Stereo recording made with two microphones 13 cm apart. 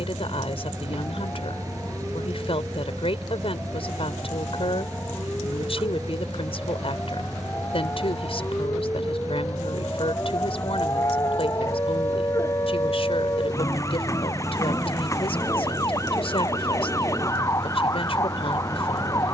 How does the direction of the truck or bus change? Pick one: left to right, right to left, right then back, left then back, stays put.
stays put.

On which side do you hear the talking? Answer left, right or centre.
left.